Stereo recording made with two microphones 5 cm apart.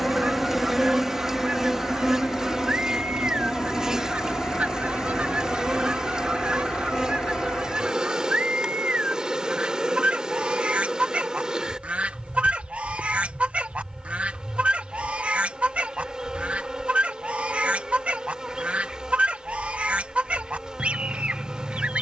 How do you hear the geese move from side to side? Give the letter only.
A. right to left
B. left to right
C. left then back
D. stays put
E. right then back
D.